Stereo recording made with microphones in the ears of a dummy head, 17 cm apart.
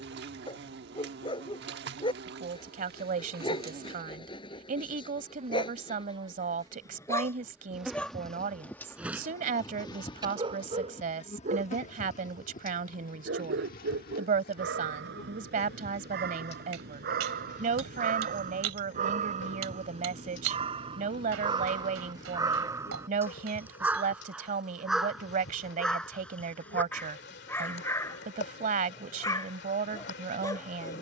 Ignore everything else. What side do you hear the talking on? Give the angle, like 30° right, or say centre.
40° right.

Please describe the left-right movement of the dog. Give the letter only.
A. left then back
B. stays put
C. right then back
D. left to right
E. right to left
C.